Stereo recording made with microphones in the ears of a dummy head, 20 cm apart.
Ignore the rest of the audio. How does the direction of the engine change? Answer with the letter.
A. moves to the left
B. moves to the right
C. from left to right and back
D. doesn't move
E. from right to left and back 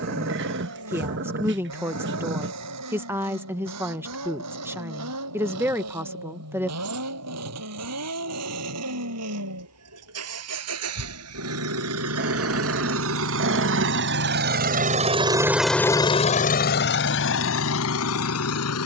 A.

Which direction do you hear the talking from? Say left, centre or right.
centre.